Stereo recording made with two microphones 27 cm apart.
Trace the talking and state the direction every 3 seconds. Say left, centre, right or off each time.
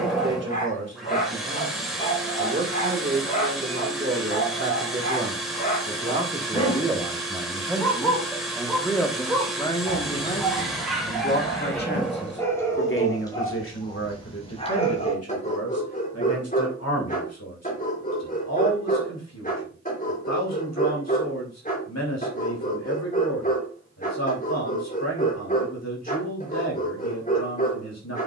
right, right, centre, left, left, left, left, left, left, left.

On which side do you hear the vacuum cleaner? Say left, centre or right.
centre.